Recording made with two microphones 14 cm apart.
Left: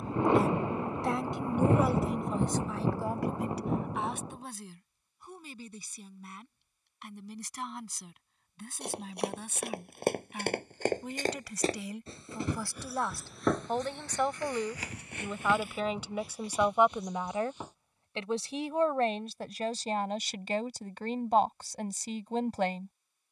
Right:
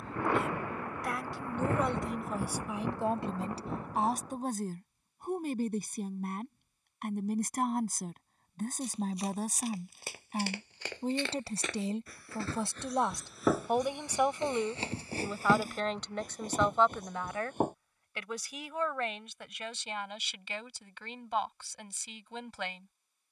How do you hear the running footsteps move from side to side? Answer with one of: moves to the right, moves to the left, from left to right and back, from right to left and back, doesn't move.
moves to the right.